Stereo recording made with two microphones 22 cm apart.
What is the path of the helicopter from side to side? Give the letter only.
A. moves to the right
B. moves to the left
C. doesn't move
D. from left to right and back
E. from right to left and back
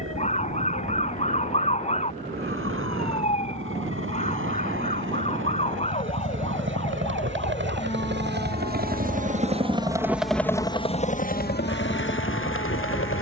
B.